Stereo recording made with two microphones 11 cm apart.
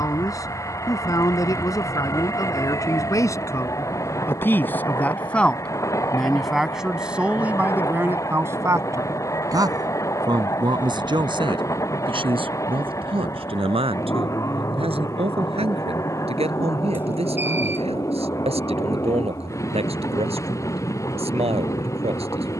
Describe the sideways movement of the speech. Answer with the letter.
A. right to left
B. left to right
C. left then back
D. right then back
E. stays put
B.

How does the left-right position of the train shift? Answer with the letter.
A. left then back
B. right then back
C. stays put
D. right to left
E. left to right
C.